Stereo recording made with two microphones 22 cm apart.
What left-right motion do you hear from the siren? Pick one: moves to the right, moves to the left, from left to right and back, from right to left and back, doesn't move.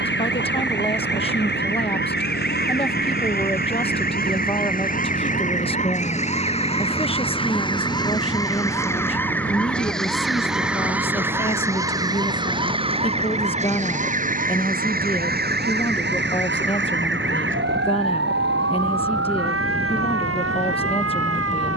moves to the right.